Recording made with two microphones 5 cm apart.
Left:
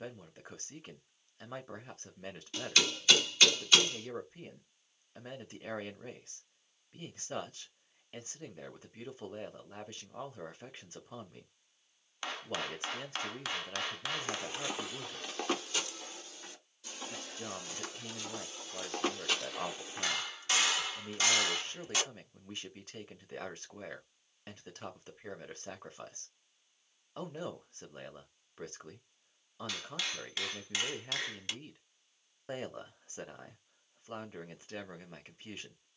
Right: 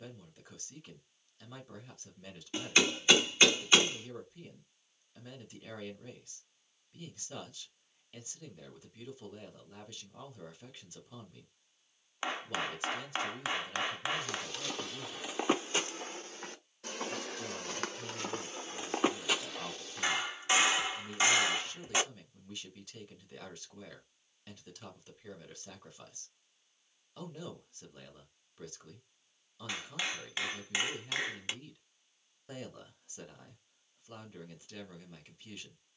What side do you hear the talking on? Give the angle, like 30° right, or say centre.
40° left.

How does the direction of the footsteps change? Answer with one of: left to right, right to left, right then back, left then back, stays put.
right then back.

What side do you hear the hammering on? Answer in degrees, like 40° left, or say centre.
20° right.